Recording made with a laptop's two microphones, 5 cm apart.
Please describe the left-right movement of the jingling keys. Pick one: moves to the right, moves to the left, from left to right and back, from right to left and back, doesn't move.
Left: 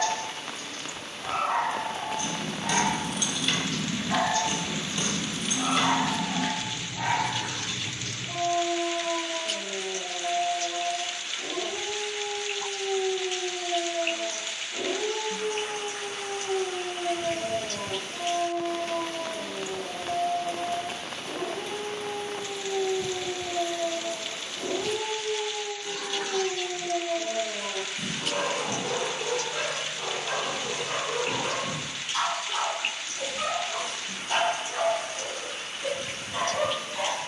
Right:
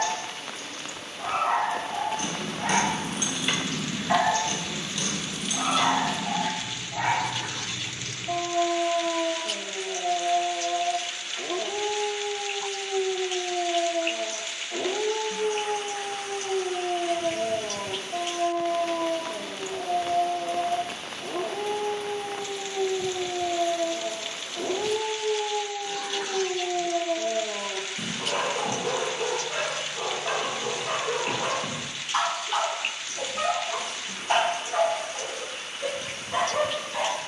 moves to the left.